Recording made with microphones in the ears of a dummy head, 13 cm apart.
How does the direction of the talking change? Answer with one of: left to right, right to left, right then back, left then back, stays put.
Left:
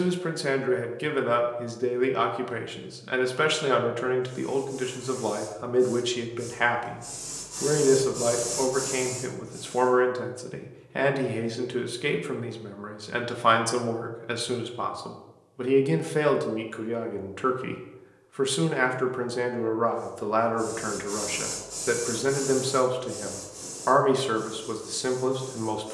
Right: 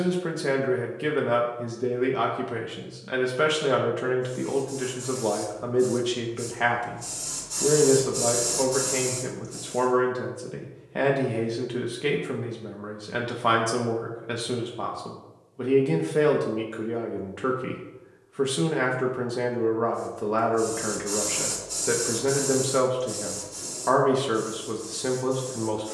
stays put.